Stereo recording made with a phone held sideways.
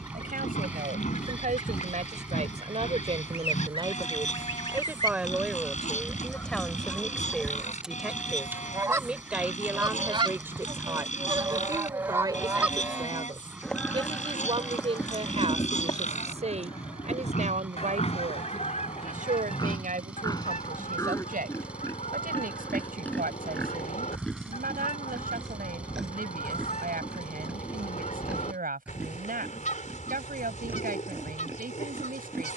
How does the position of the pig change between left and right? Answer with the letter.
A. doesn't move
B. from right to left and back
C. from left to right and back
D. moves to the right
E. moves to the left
D.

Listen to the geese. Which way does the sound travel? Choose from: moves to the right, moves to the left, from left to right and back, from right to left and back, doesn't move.
from left to right and back.